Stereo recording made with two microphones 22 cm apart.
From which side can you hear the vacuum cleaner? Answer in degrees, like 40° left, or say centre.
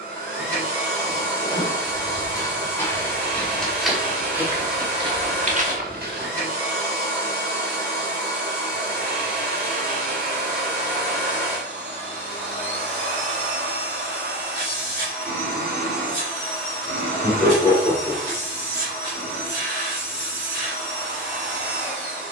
50° left.